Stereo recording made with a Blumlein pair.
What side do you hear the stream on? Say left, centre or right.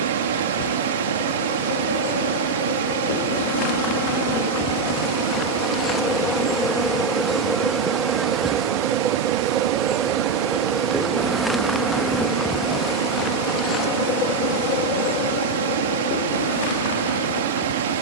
right.